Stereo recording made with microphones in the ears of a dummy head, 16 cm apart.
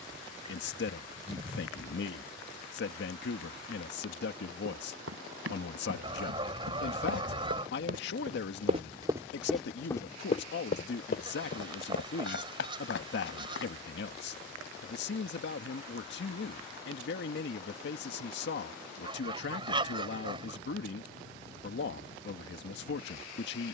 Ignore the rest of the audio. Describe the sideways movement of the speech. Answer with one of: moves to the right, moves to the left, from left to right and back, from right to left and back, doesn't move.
doesn't move.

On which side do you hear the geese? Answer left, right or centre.
right.